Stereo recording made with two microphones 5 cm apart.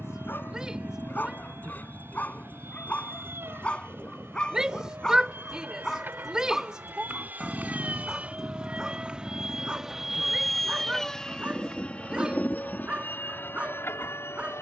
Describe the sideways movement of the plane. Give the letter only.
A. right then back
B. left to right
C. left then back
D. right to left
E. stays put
D.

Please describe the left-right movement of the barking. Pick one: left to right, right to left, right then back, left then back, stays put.
left to right.